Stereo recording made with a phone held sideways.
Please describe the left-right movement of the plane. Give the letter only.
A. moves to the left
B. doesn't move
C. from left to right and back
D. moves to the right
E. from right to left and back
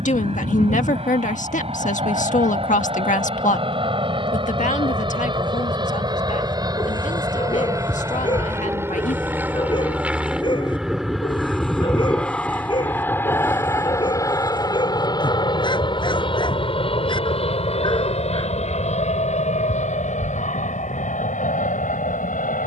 A.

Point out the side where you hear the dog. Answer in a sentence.
You can hear the dog on the left.